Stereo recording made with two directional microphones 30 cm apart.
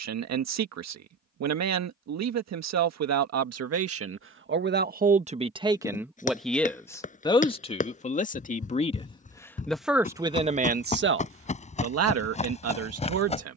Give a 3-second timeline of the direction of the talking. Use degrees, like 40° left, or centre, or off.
60° right, 40° right, 10° left, 20° right, 50° right.